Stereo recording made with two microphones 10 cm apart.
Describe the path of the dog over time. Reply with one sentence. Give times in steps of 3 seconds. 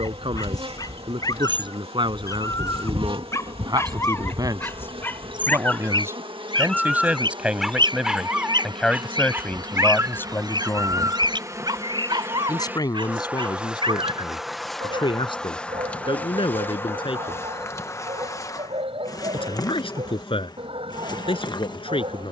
In this clip you hear the dog on the left from 0 s, in the centre from 6 s and on the right from 9 s.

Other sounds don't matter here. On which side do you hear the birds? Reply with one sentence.
In this clip you hear the birds on the right.